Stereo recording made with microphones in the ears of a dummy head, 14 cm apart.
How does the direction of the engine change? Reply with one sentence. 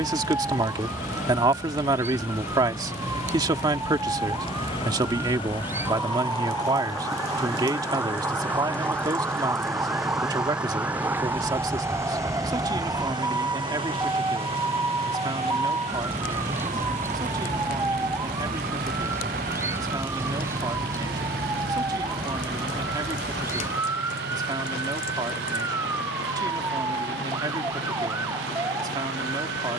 You can hear the engine move from left to right.